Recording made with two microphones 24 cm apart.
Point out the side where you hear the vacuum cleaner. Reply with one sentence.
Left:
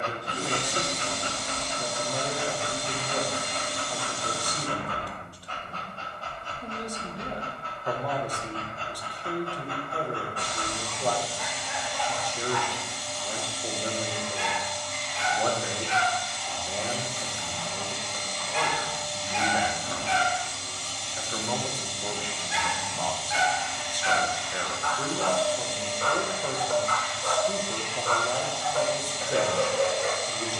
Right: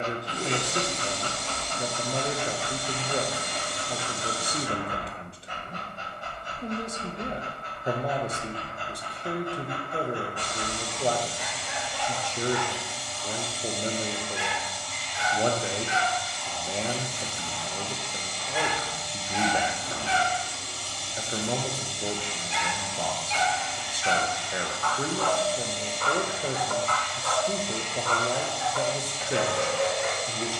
You can hear the vacuum cleaner in the centre.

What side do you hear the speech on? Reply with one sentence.
In this clip you hear the speech on the right.